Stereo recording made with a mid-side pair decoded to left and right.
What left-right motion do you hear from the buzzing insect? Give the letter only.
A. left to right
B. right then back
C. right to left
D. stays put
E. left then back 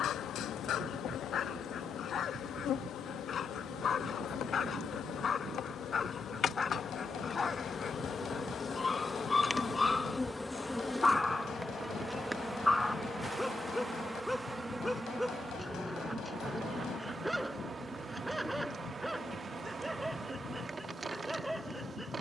A.